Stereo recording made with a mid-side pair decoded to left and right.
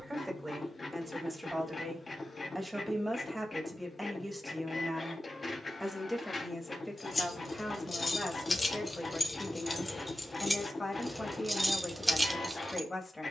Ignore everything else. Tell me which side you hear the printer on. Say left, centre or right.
left.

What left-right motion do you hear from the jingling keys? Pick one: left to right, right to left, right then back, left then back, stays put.
left to right.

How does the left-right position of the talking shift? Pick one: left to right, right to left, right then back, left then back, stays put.
right to left.